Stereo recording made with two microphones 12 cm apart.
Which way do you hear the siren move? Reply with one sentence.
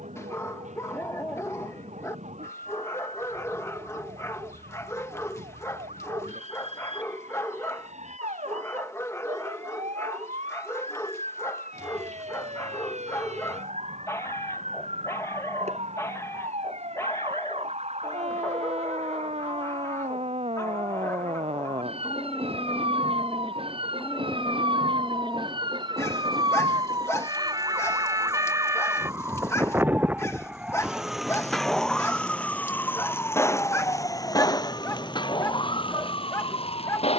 In this clip you hear the siren move from right to left.